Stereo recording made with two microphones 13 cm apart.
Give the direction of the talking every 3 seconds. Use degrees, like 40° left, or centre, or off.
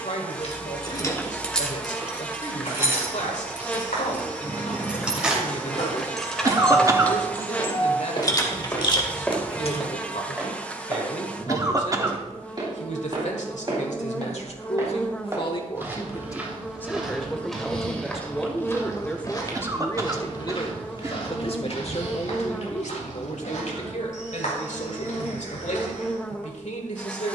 70° left, 70° left, 70° left, 70° left, 60° left, 20° left, 20° left, 60° left, 70° left.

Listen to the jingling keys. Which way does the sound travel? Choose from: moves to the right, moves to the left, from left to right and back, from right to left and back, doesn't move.
from left to right and back.